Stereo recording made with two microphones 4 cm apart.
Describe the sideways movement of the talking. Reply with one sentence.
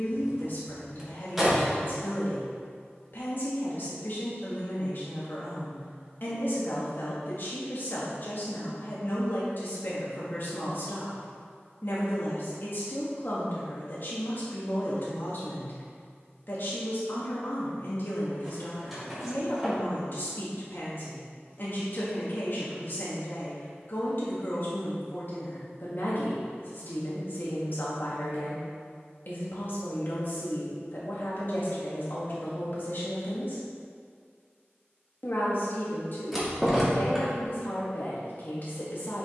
In this clip you hear the talking stay put.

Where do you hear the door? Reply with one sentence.
In this clip you hear the door in the centre.